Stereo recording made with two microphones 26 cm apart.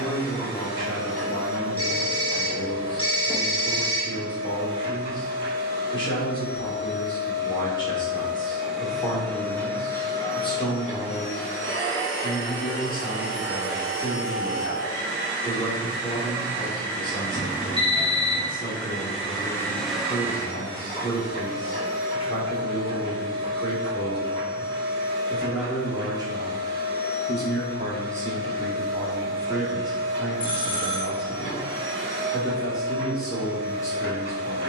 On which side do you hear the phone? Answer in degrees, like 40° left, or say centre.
20° left.